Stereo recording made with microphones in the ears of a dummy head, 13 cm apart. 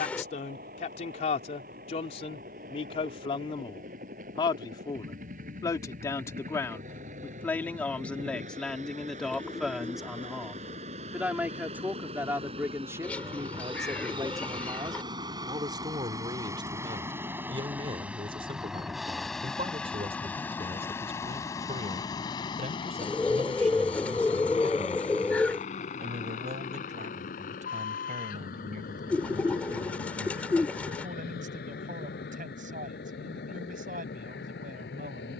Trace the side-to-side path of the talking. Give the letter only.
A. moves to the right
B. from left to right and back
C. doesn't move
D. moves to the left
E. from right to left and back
A.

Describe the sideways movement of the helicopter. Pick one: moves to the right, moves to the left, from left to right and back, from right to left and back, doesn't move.
moves to the left.